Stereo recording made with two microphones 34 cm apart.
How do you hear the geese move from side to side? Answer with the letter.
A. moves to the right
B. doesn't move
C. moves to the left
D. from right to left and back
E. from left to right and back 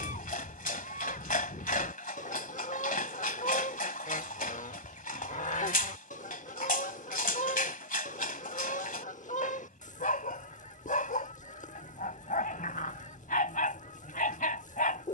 B.